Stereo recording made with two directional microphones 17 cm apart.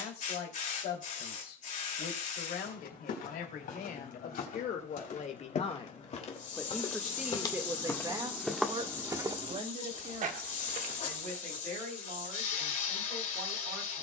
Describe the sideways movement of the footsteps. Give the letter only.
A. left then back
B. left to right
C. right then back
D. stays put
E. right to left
B.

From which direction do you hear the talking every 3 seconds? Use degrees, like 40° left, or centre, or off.
70° left, 50° left, 10° right, 50° right, 60° right.